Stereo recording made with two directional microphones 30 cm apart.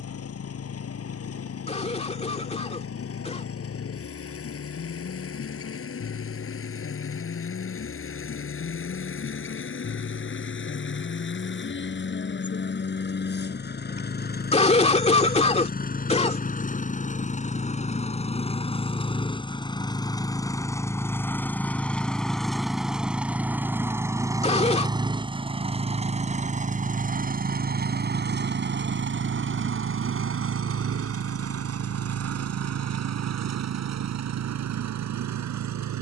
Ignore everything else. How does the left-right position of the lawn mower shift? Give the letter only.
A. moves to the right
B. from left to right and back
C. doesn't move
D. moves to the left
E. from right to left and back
A.